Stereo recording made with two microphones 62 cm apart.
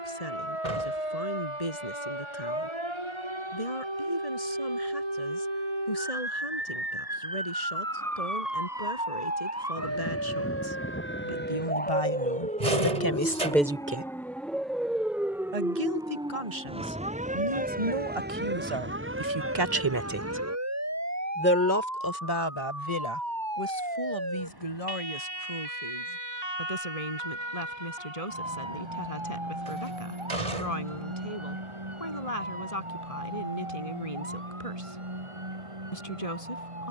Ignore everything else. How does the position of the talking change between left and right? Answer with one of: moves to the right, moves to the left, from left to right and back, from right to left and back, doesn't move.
from left to right and back.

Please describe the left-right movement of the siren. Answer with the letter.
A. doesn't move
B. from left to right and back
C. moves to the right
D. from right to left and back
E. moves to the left
C.